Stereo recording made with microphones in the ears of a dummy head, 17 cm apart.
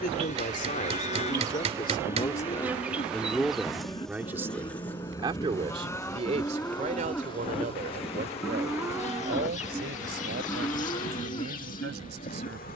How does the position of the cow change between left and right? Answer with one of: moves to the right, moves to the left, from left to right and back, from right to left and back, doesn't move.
from left to right and back.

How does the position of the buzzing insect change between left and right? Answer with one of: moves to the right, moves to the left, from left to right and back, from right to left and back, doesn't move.
moves to the left.